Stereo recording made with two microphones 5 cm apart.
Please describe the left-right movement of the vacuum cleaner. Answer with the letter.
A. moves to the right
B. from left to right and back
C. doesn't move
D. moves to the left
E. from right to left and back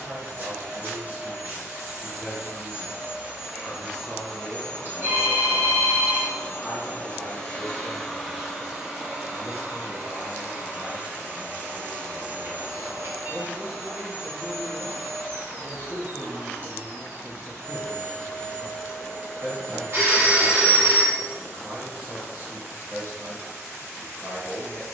E.